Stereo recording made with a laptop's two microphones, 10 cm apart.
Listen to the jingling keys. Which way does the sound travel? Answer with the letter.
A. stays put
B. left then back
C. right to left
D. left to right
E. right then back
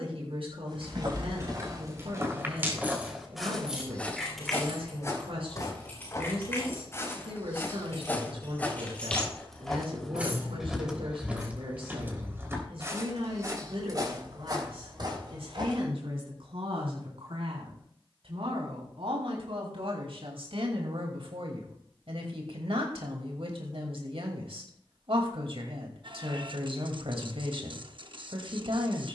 B.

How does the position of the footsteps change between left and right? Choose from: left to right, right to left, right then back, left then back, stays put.
left then back.